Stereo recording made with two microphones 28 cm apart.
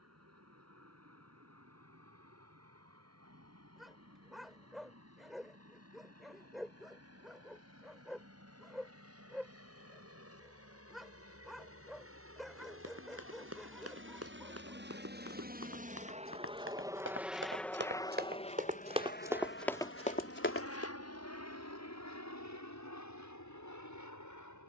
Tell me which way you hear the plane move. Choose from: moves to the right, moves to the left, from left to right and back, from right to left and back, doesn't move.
moves to the left.